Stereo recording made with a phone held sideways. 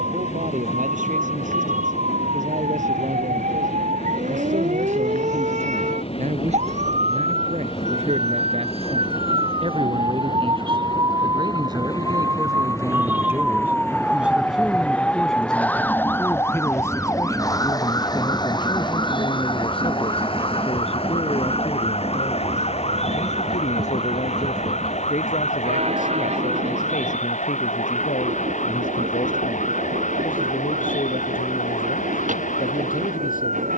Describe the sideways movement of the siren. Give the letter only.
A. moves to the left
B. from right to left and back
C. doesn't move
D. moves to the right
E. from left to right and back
A.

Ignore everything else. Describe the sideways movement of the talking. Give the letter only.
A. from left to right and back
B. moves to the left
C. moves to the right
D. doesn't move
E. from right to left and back
B.